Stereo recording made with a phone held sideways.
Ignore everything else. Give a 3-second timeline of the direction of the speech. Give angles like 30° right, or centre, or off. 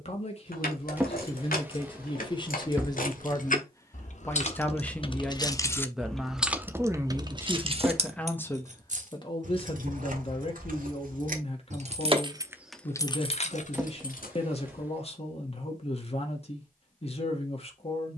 40° left, 10° left, centre, 40° left, 40° left, 40° left.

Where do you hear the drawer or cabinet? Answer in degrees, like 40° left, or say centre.
10° right.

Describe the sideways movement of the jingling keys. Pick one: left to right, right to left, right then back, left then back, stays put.
right then back.